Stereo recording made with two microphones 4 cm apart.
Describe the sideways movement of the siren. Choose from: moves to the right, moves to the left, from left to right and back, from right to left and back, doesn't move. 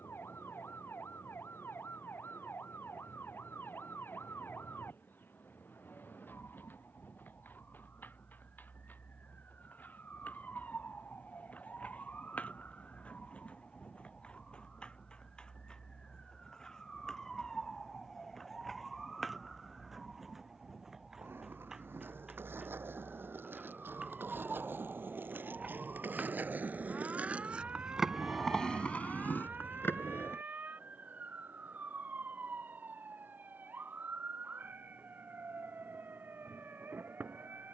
moves to the right.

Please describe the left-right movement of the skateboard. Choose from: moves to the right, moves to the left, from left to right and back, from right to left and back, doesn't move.
moves to the left.